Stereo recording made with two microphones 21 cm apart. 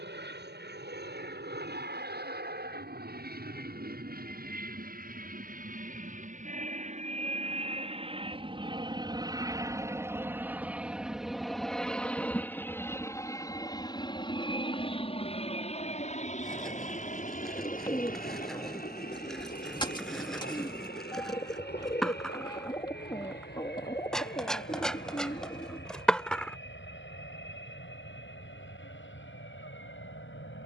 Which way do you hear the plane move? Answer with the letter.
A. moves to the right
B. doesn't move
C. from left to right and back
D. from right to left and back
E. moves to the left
E.